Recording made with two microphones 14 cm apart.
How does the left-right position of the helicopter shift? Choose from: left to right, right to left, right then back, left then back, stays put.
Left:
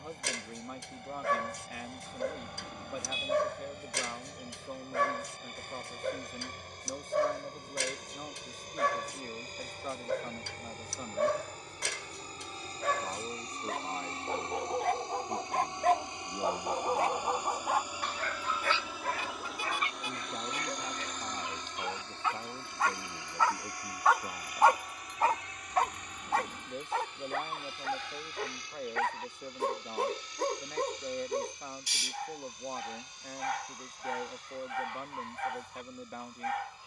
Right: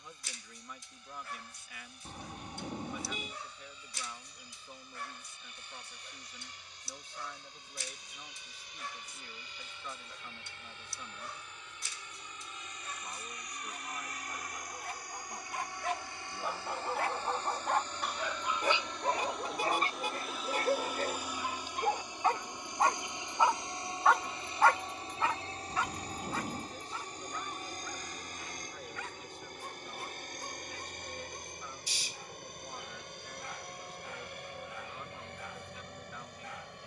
left to right.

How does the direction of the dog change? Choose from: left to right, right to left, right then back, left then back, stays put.
right then back.